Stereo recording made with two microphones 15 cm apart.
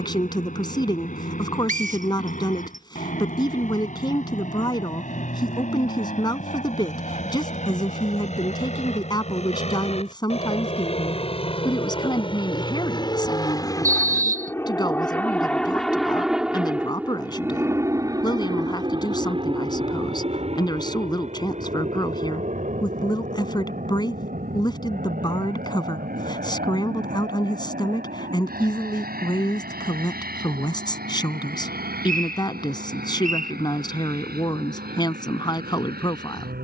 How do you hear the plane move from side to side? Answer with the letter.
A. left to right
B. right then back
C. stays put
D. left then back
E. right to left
A.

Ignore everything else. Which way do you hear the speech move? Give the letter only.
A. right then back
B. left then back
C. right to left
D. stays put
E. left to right
D.